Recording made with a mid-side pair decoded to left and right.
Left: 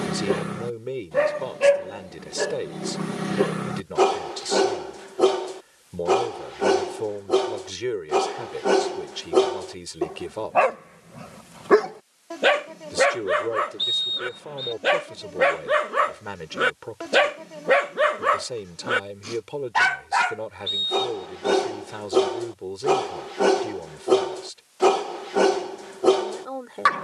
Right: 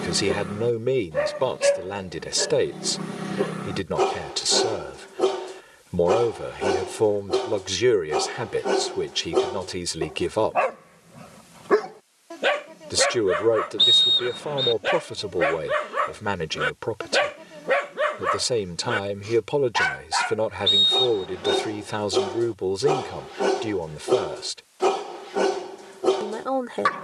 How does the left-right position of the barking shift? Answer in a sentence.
You can hear the barking stay put.